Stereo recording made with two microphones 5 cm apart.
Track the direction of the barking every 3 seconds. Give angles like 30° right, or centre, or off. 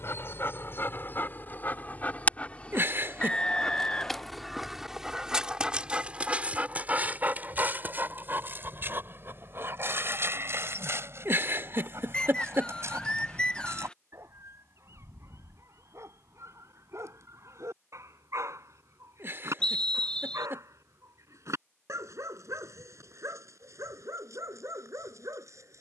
40° left, centre, 40° right, 50° right, 60° right, 70° right, 70° right, 70° right, 70° right.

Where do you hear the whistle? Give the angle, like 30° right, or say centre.
20° left.